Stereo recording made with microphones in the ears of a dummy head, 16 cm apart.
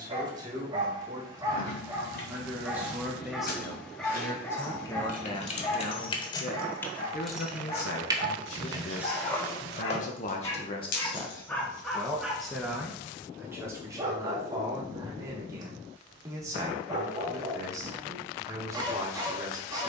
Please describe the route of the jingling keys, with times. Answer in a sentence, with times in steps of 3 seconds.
In this clip you hear the jingling keys on the left from 0 s, in the centre from 6 s, on the left from 9 s and not at all from 12 s.